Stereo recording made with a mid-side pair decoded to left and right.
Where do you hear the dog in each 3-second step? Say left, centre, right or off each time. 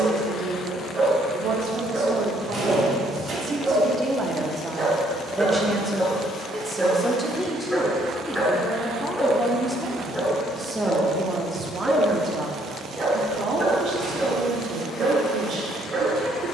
right, right, centre, centre, right, right.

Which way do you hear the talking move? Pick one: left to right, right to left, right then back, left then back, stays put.
left then back.